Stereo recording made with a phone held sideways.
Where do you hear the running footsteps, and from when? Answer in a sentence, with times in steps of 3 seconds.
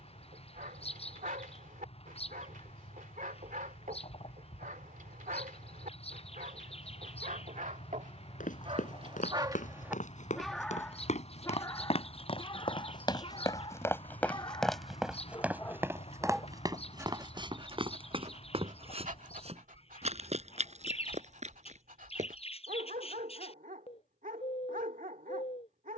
In this clip you hear the running footsteps not at all from 0 s, on the left from 6 s, on the right from 15 s and not at all from 24 s.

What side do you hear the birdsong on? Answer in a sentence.
In this clip you hear the birdsong on the left.